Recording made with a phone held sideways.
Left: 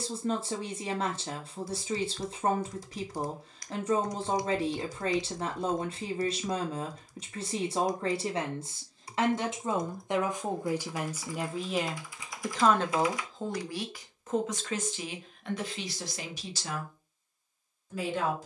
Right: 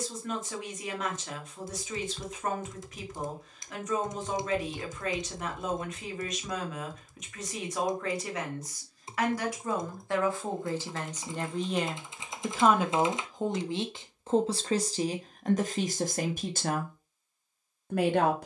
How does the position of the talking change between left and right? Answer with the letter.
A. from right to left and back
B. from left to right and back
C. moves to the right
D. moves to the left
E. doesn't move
C.